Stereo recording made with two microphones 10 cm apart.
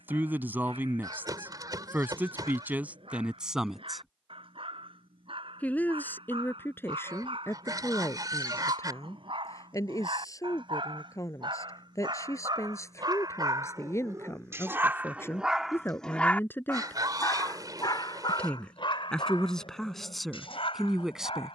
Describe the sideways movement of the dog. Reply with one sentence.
You can hear the dog go from the right side to the left.